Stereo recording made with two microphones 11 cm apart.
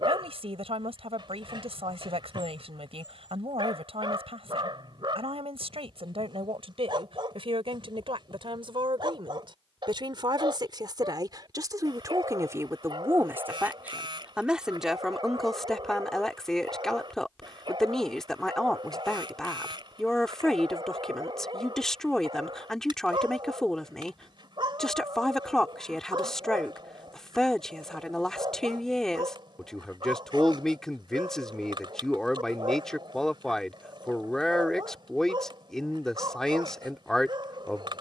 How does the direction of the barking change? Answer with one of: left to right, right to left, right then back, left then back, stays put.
stays put.